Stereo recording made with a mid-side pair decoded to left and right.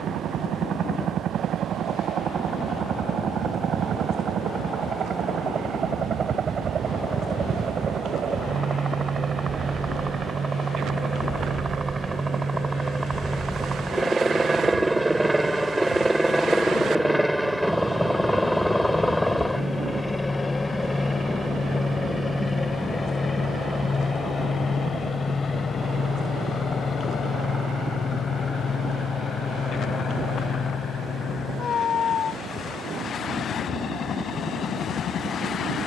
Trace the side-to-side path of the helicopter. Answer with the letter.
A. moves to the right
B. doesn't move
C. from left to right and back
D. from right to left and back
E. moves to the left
E.